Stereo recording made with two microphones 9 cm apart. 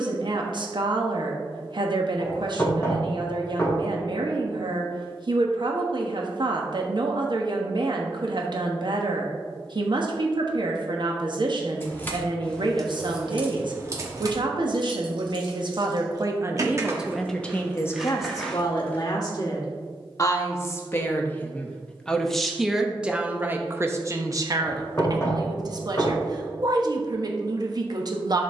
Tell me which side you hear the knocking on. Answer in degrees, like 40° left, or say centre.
30° left.